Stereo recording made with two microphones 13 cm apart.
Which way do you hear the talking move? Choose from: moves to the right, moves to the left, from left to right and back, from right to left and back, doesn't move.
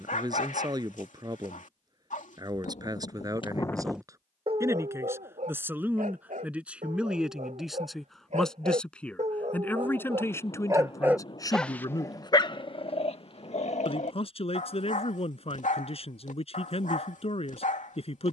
moves to the left.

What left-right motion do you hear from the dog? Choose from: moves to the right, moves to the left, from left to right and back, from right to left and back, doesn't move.
from left to right and back.